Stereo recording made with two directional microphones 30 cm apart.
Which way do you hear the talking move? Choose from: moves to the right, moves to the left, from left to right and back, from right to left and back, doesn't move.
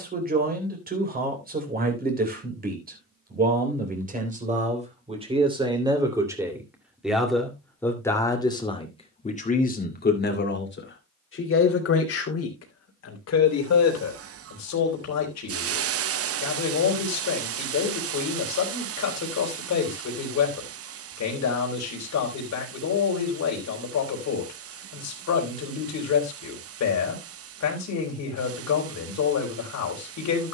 moves to the left.